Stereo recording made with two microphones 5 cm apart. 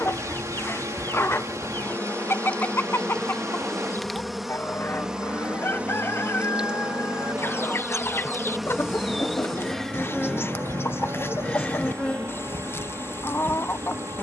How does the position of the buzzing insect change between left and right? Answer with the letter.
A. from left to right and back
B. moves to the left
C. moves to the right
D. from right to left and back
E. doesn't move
A.